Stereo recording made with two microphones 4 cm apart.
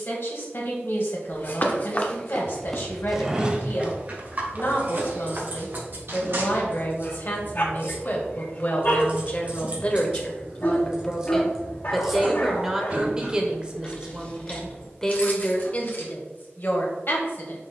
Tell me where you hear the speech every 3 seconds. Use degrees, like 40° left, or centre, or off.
60° left, 60° left, 50° left, 20° left, 10° right, 40° left.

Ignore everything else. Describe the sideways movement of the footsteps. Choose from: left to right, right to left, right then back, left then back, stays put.
left to right.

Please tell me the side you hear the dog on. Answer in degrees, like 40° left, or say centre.
50° left.